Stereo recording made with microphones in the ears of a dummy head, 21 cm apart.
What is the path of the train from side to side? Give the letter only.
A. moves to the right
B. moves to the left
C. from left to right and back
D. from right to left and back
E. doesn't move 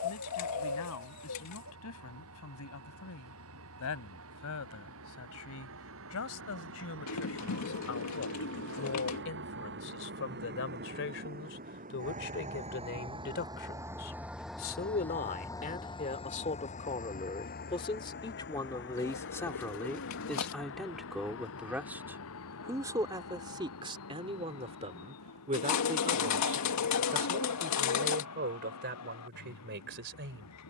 B.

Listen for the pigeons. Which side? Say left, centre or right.
left.